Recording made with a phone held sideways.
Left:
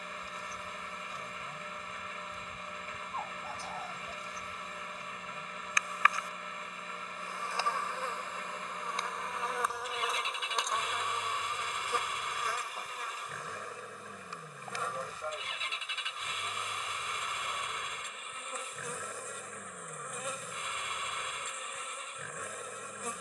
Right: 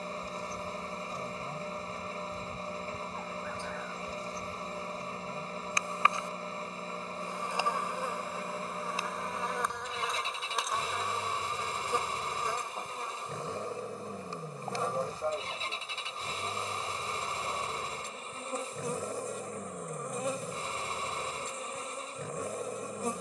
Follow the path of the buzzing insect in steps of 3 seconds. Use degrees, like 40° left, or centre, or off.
40° right, 30° right, 10° right, centre, 30° right, 30° right, 30° right, 30° right.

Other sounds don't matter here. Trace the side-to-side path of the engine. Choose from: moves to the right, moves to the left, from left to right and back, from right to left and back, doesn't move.
doesn't move.